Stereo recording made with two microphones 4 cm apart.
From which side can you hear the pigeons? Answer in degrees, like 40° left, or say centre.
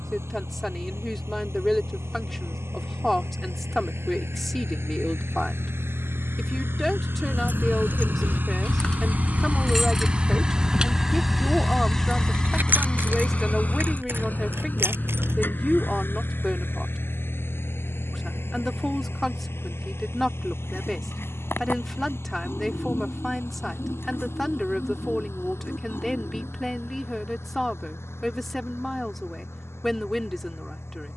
70° left.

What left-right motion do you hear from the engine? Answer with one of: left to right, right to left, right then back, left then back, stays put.
right to left.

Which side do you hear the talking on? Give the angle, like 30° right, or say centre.
centre.